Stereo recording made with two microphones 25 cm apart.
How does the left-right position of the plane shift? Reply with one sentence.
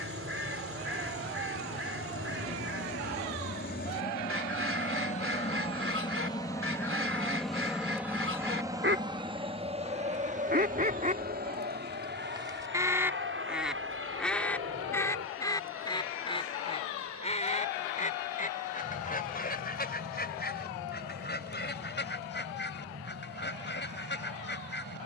You can hear the plane travel towards the right.